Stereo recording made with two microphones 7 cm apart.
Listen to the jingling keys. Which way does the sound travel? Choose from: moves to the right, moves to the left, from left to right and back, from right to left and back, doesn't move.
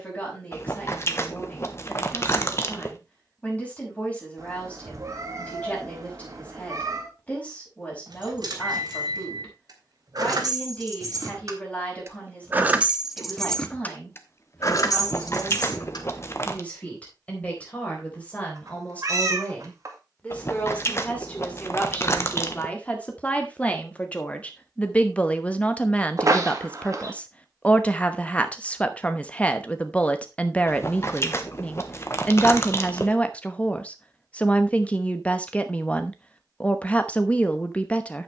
moves to the left.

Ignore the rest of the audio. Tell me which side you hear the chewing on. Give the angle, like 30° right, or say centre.
40° left.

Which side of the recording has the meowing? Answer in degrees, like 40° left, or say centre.
50° right.